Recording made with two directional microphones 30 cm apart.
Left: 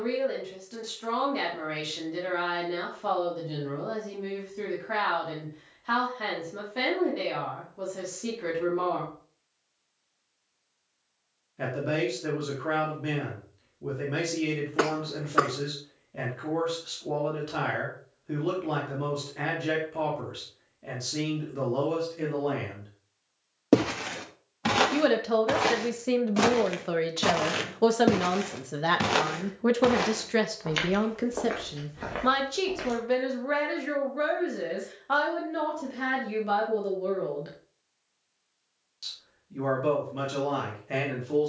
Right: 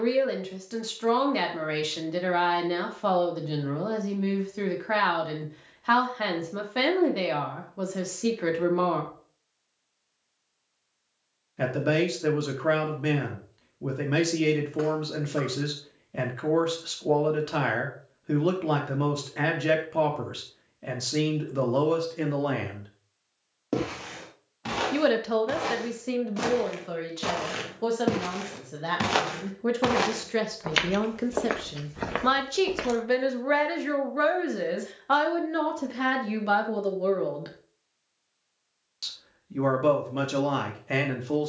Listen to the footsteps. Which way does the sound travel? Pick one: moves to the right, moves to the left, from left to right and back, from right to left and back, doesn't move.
moves to the right.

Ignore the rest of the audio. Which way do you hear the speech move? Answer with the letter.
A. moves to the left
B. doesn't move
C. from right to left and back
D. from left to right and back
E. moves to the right
C.